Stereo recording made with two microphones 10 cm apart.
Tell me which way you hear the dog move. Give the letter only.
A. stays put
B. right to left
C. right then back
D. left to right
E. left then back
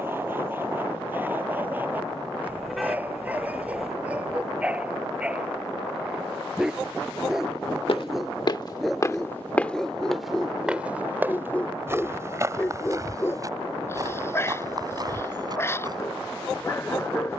B.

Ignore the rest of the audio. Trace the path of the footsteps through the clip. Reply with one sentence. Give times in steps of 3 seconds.
You can hear the footsteps not at all from 0 s, on the left from 6 s, in the centre from 9 s and on the right from 12 s.